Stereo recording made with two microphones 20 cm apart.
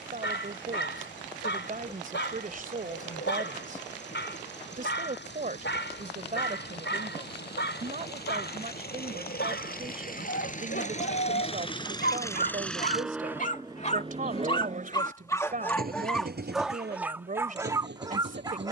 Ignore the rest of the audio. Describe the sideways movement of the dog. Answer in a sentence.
You can hear the dog move from left to right.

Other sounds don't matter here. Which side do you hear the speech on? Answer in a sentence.
You can hear the speech on the right.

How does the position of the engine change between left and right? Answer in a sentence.
You can hear the engine move from left to right.